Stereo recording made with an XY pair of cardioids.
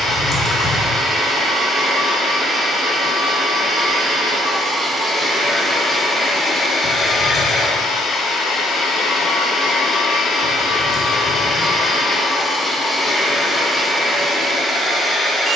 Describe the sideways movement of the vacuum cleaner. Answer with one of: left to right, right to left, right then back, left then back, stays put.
left then back.